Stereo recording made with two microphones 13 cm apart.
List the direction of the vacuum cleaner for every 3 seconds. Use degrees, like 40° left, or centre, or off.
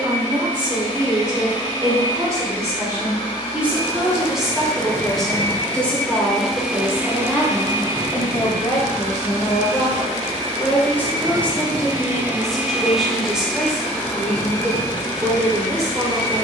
40° left, 30° left, 30° right, 50° right, 10° left, 30° left.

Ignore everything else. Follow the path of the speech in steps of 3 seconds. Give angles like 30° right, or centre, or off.
30° right, centre, 20° left, 20° left, centre, 30° right.